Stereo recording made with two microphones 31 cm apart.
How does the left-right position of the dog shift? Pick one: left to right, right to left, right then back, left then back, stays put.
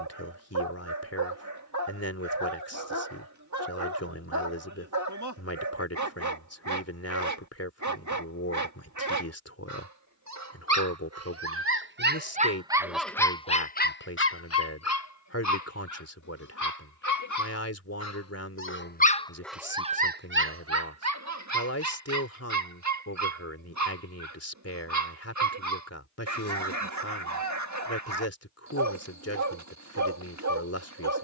left then back.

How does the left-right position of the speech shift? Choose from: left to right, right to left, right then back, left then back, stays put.
stays put.